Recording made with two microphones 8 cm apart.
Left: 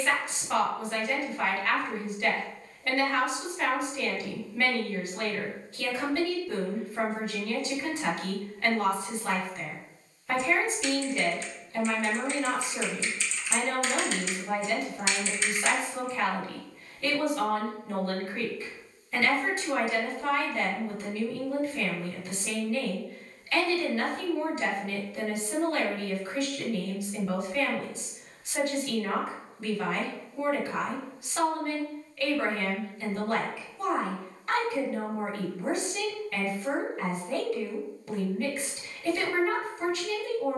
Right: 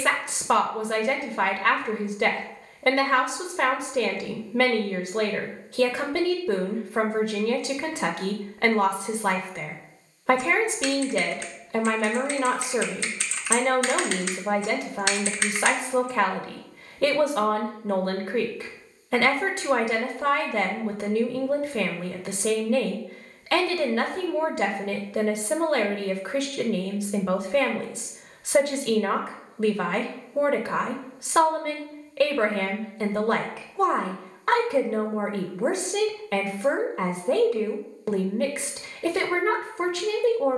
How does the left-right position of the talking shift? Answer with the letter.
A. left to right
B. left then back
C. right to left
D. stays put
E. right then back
D.